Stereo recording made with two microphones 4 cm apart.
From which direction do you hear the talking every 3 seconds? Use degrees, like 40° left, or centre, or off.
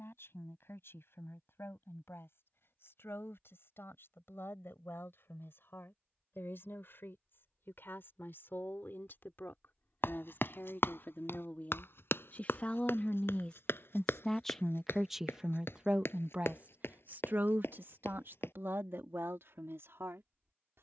70° left, 60° left, 60° left, 50° left, 20° left, 30° right, 70° right.